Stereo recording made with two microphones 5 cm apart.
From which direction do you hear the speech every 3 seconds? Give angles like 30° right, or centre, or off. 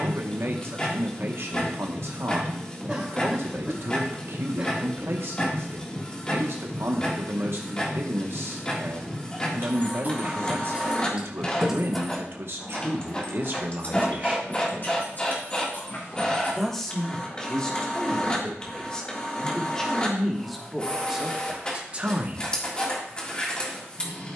60° right, 60° right, 60° right, 60° right, 50° right, 10° left, 10° left, 20° right.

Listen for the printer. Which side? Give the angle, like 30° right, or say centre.
20° left.